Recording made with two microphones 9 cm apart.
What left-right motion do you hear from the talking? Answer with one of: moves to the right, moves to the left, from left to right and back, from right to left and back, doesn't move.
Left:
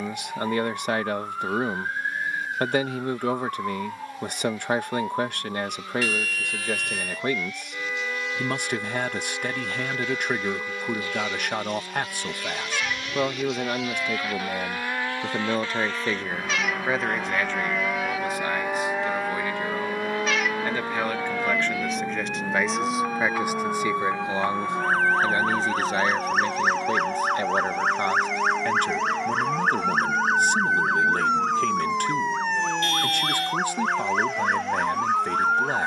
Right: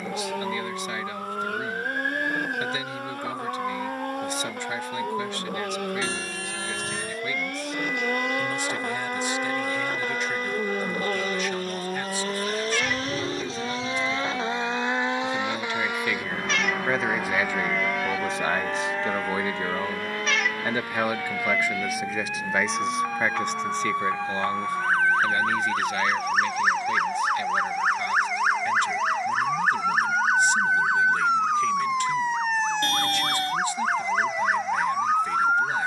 from left to right and back.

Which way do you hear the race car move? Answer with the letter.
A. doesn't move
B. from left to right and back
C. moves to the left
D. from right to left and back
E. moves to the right
C.